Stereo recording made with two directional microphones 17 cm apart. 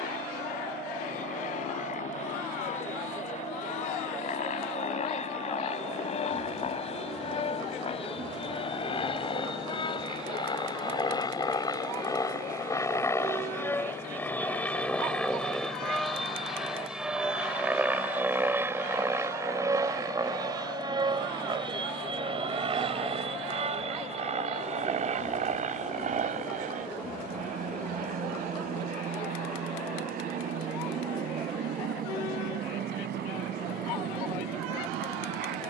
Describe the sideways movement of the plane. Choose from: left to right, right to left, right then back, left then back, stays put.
left to right.